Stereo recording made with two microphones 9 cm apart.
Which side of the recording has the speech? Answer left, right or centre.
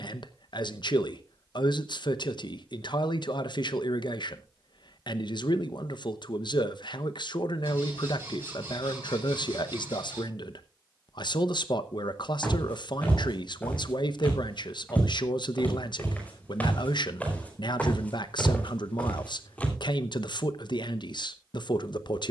left.